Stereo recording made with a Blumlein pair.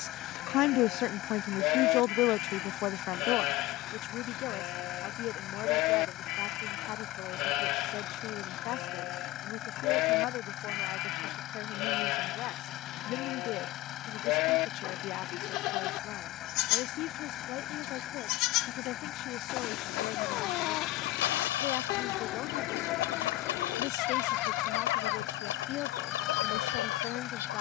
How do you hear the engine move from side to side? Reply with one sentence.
You can hear the engine stay put.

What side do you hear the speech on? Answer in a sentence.
In this clip you hear the speech on the left.